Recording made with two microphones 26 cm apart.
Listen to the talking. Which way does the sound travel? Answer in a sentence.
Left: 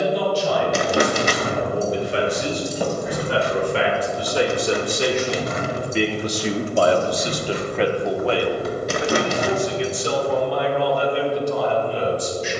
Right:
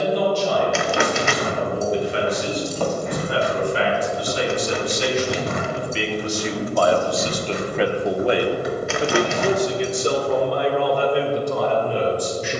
You can hear the talking travel towards the right.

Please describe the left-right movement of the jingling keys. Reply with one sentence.
In this clip you hear the jingling keys go right and come back.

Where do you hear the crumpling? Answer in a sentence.
You can hear the crumpling on the left.